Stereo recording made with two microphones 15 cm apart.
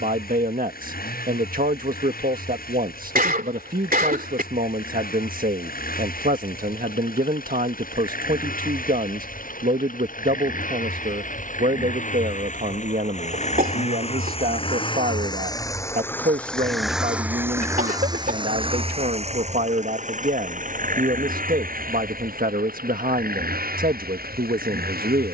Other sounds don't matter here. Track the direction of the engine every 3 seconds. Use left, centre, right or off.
left, left, left, left, left, centre, right, right, right.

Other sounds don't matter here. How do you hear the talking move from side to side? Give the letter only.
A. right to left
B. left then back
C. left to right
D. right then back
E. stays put
E.